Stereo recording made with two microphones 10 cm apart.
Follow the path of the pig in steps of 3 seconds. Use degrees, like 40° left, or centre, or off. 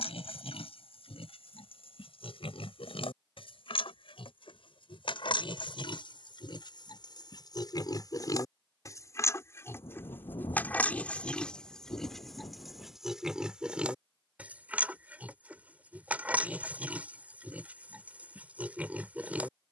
80° left, 70° left, 50° left, 20° left, 10° right, 10° right, 10° right.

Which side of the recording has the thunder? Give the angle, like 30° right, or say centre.
50° left.